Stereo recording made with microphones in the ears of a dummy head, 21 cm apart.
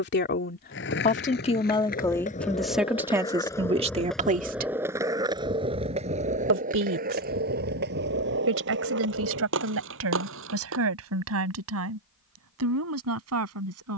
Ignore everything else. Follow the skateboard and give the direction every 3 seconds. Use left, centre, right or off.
left, centre, right, right, off.